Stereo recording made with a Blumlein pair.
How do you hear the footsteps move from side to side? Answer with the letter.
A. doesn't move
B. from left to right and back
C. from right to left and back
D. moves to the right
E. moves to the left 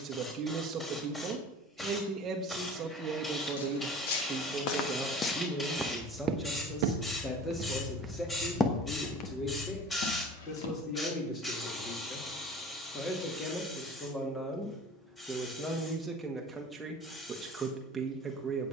B.